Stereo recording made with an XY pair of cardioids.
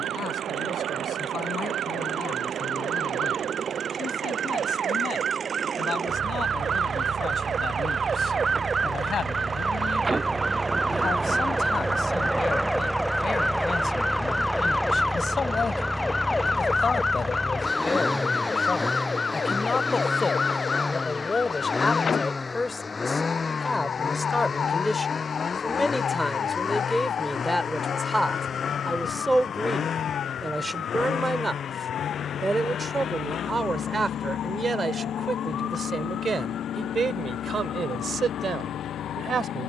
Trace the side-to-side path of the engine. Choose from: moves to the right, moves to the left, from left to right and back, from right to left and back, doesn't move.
moves to the left.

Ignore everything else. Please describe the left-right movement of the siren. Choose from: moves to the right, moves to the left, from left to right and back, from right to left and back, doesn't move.
moves to the left.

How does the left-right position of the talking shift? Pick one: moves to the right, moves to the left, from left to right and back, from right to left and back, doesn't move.
moves to the right.